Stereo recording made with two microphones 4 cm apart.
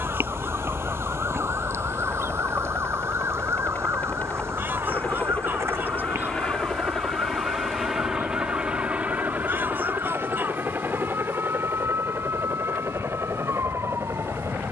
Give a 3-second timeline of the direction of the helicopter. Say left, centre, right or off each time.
left, left, centre, right, right.